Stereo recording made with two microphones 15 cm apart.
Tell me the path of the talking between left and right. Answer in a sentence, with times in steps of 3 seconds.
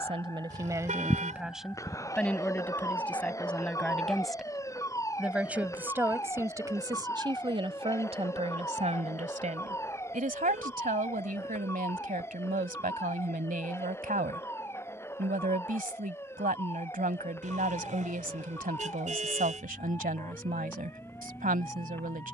You can hear the talking in the centre from 0 s and on the right from 6 s.